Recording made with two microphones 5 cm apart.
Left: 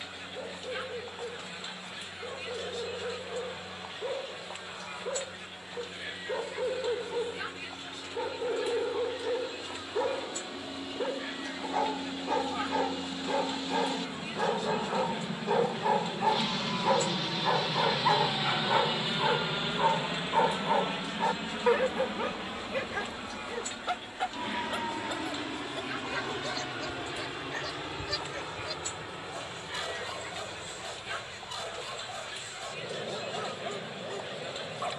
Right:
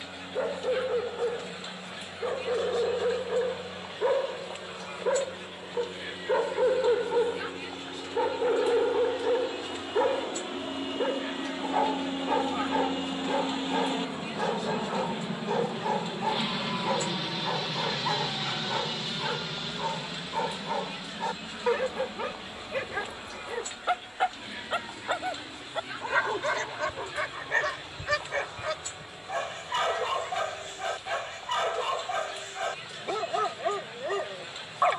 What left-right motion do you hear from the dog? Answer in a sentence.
You can hear the dog move from right to left and back again.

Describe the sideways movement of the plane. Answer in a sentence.
You can hear the plane move from right to left.